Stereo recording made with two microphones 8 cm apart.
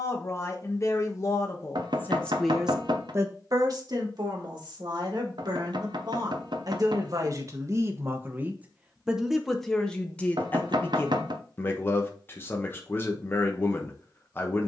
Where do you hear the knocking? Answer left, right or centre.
right.